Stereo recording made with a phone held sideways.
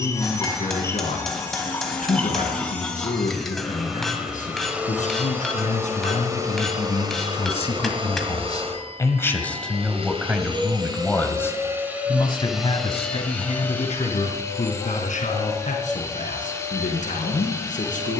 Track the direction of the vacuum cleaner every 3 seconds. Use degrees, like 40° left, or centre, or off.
10° left, 10° right, 40° right, 40° right, 10° left, 20° left.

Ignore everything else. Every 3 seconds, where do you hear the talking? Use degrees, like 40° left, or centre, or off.
80° left, 70° left, 50° left, 10° left, 50° left, 70° left.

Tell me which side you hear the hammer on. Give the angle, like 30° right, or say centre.
centre.